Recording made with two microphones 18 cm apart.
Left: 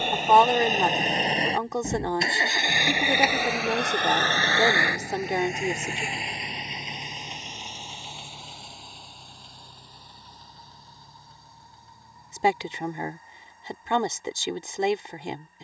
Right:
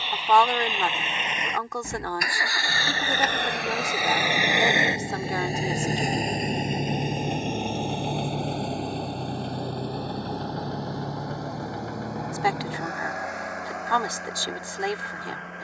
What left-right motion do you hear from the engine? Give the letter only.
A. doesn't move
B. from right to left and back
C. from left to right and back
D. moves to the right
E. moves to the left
D.